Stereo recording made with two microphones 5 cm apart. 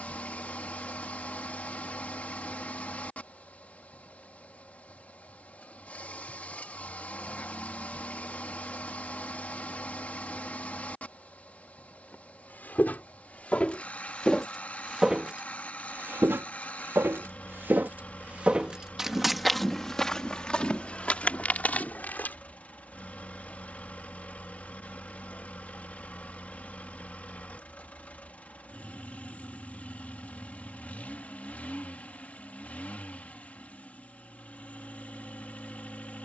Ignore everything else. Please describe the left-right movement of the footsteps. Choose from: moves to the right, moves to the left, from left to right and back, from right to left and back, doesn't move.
from left to right and back.